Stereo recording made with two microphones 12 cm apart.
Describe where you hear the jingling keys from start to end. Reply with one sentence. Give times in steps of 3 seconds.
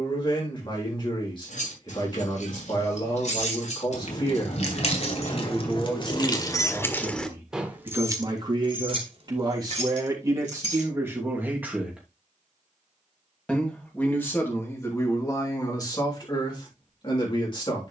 You can hear the jingling keys on the left from 0 s, in the centre from 6 s, on the right from 9 s and not at all from 12 s.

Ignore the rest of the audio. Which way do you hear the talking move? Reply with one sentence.
In this clip you hear the talking move from left to right and back again.